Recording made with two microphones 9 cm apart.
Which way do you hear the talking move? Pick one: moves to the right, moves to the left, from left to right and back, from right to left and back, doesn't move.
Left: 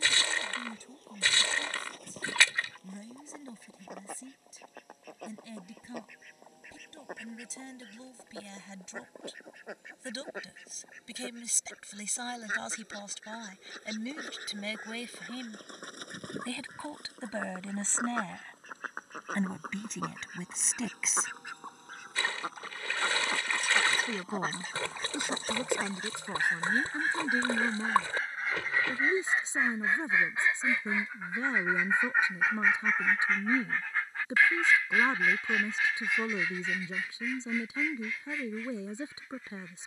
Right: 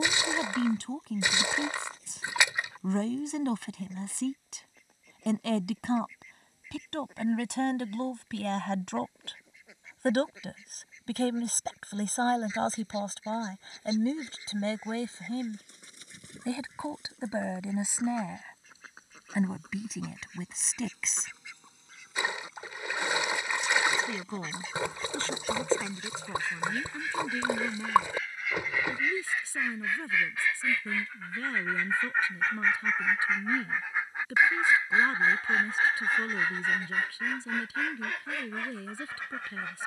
moves to the left.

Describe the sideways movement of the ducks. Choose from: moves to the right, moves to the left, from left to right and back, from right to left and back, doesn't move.
moves to the right.